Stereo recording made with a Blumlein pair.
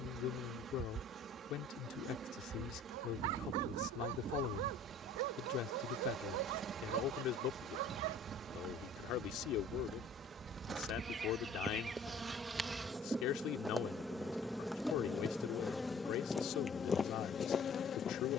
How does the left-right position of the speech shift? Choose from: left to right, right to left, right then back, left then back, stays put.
stays put.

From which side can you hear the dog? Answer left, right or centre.
right.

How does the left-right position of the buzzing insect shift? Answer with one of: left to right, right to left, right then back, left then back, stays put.
right to left.